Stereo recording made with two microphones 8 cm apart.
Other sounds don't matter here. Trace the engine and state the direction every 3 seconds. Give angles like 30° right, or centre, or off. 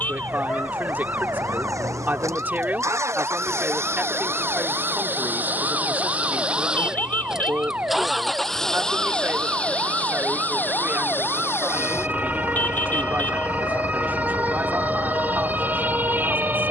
50° right, 30° right, 10° right, 20° left, 40° left, 50° left.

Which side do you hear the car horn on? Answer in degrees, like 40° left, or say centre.
30° left.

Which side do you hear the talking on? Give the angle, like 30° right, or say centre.
30° right.